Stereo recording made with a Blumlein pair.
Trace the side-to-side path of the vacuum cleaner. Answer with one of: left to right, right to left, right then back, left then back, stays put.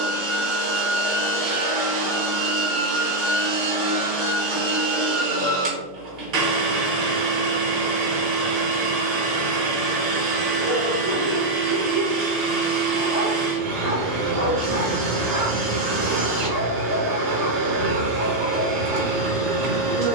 stays put.